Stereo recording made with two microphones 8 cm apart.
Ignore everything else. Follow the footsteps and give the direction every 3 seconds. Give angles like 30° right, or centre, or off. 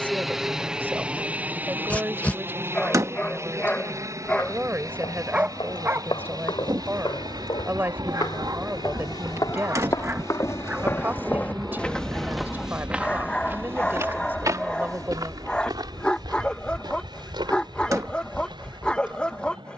off, 70° left, 60° left, 40° left, 20° right, 60° right, 70° right.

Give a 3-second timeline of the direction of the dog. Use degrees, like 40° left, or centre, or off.
20° left, centre, 40° right, 20° right, 10° left, 10° left, 10° left.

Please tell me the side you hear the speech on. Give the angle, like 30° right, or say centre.
20° right.